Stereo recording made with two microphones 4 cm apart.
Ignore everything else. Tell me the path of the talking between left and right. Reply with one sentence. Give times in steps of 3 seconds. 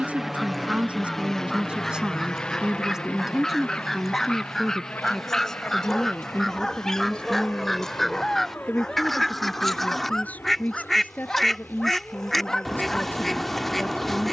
You can hear the talking on the right from 0 s, in the centre from 3 s and on the left from 6 s.